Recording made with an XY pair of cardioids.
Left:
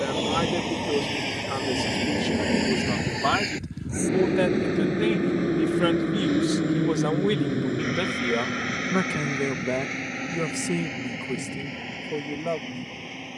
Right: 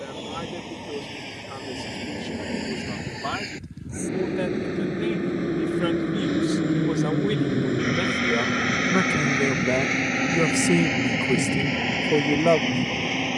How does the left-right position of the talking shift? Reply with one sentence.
In this clip you hear the talking travel towards the right.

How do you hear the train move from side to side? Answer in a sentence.
In this clip you hear the train move from left to right.